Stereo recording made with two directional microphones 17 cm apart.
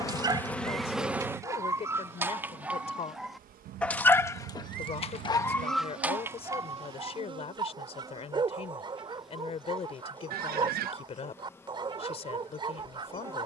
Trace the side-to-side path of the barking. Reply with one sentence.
You can hear the barking move from right to left and back again.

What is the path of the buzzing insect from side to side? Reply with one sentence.
You can hear the buzzing insect move from left to right and back again.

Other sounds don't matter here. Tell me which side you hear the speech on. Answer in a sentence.
You can hear the speech on the left.